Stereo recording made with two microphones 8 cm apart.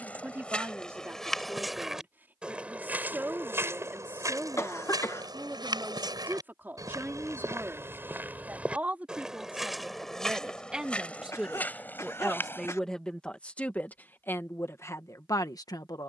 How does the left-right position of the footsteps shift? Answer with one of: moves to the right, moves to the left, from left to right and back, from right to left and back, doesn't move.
from left to right and back.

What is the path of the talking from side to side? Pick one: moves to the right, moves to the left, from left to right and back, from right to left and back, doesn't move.
moves to the left.